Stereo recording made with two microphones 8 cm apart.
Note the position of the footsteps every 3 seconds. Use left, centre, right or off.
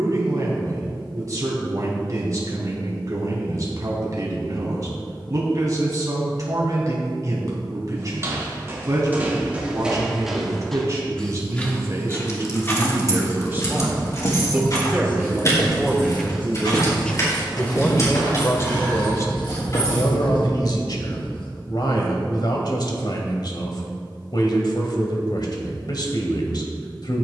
off, off, right, centre, left, left, left, off, off.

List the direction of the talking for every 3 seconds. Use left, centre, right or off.
right, right, right, right, right, centre, left, left, left.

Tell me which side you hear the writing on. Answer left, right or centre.
left.